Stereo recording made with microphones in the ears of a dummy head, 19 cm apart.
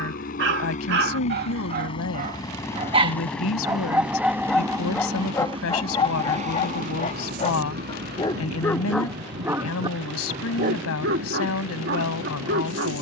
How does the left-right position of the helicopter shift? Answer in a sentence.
You can hear the helicopter move to the right.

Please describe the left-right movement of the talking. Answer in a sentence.
In this clip you hear the talking stay put.